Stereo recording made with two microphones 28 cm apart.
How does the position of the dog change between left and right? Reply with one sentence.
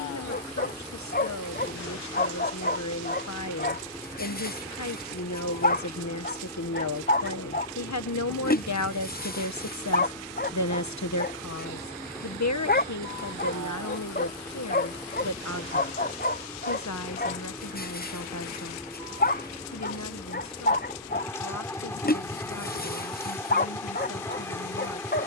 In this clip you hear the dog stay in one place.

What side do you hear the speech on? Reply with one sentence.
You can hear the speech on the left.